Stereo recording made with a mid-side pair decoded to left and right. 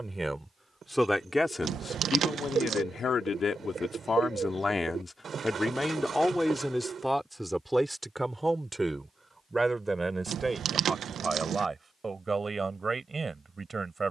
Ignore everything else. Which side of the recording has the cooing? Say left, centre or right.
right.